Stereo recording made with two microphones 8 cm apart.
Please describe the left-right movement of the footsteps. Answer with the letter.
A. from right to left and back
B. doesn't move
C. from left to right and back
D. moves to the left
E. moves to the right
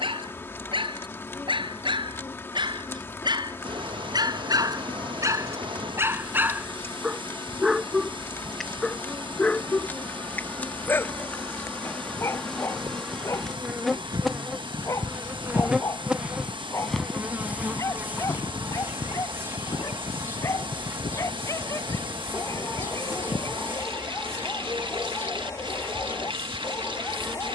D.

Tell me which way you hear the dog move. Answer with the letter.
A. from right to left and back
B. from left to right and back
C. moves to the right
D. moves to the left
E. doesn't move
D.